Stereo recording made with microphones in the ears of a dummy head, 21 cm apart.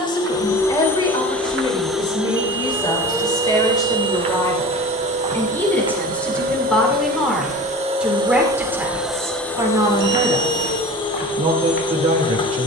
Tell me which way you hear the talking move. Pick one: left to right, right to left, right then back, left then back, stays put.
left to right.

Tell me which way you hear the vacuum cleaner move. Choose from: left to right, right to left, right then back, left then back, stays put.
right then back.